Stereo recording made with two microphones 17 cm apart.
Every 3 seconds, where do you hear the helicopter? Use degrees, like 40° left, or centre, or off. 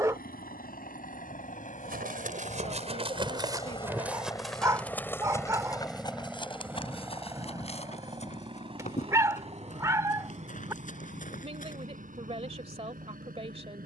50° left, 20° left, 20° right, 40° right, 50° right.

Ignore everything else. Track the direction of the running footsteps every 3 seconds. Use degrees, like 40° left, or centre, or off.
50° right, centre, 40° left, 50° left, off.